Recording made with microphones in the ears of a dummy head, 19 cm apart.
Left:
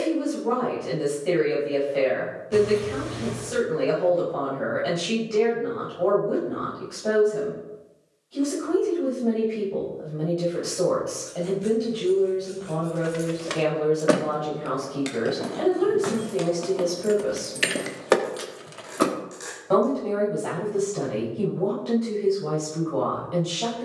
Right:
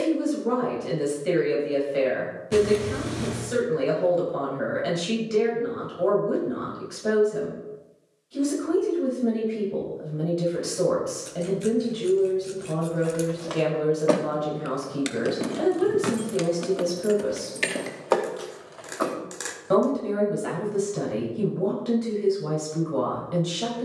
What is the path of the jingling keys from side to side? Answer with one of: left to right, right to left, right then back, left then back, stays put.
right then back.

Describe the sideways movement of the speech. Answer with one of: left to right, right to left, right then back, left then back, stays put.
stays put.